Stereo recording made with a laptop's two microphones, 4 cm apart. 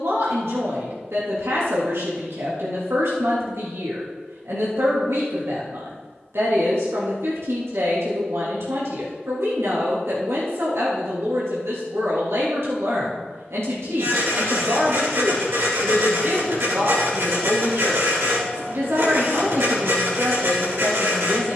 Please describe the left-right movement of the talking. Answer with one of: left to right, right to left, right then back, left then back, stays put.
stays put.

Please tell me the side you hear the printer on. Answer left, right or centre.
right.